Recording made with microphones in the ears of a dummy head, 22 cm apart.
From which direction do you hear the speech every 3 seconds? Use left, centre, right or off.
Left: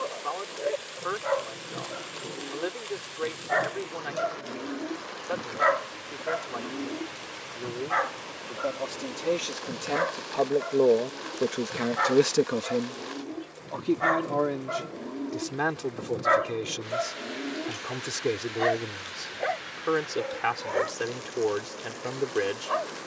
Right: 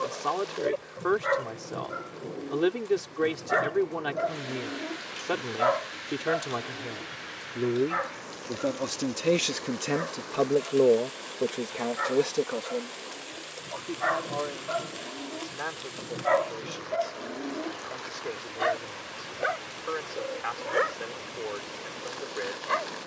right, right, right, centre, left, left, left, left.